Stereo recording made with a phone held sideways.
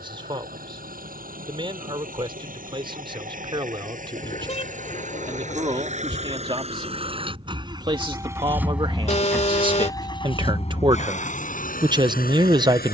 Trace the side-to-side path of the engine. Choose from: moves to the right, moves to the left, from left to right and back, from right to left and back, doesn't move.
moves to the left.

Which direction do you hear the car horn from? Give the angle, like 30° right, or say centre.
40° left.